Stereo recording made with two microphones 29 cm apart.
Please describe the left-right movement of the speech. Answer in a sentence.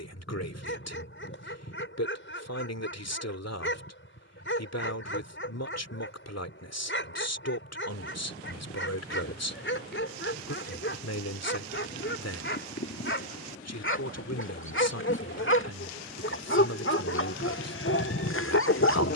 You can hear the speech stay put.